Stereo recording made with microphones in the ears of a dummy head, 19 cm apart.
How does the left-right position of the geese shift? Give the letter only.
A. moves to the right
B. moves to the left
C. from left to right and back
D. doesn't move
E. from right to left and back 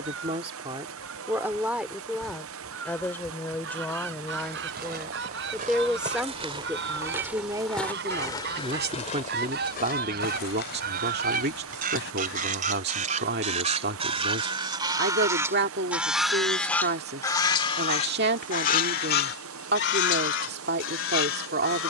B.